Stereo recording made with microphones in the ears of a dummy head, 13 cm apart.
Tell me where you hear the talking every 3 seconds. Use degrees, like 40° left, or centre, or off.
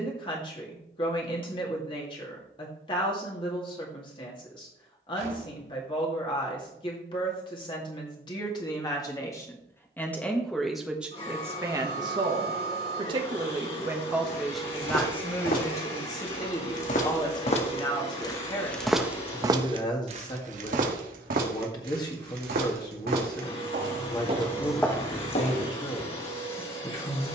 40° left, 40° left, 30° left, centre, 20° right, 30° left, 30° left, 30° left, 30° left.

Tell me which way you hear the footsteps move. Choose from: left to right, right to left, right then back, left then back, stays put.
right then back.